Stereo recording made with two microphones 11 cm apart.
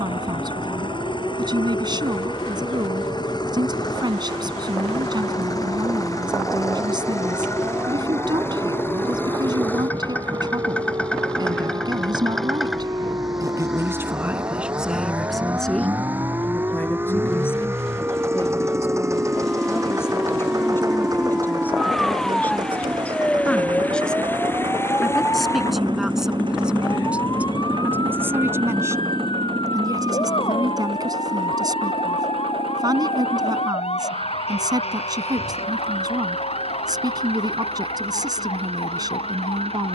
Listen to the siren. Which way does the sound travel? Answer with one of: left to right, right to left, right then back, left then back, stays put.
right to left.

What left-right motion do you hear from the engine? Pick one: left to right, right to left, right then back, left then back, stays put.
left to right.